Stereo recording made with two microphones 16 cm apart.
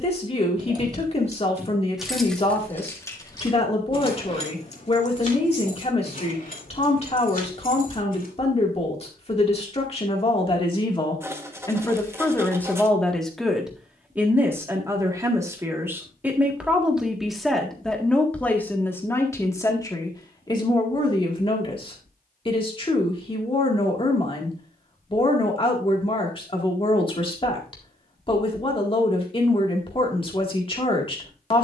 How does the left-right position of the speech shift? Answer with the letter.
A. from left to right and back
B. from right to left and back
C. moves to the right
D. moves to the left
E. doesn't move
A.